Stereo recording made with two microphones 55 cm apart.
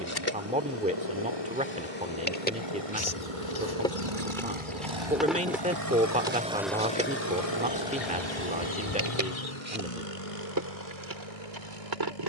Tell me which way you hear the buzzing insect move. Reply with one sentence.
In this clip you hear the buzzing insect travel towards the right.